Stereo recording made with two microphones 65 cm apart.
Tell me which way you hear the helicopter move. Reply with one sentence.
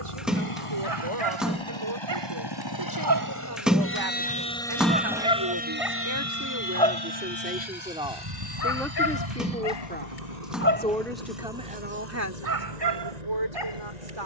In this clip you hear the helicopter travel towards the right.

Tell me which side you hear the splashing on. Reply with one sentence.
In this clip you hear the splashing in the centre.